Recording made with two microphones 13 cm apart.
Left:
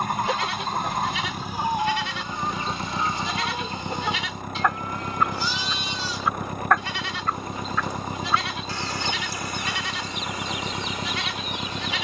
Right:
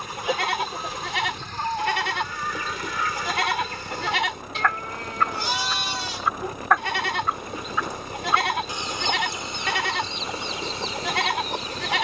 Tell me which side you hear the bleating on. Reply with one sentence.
You can hear the bleating on the right.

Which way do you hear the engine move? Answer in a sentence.
You can hear the engine stay in one place.